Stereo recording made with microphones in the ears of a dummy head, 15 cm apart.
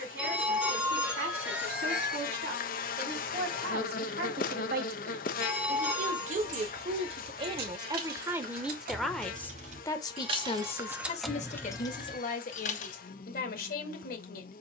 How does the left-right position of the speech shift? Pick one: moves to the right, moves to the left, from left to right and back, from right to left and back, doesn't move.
moves to the left.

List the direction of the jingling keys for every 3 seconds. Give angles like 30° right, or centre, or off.
off, off, 60° right, 20° right, 40° left.